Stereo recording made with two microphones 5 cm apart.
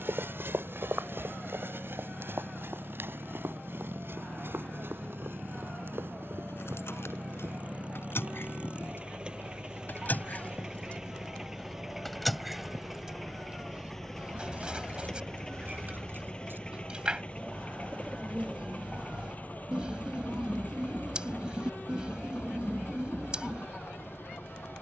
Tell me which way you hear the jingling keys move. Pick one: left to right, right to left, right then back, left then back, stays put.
left to right.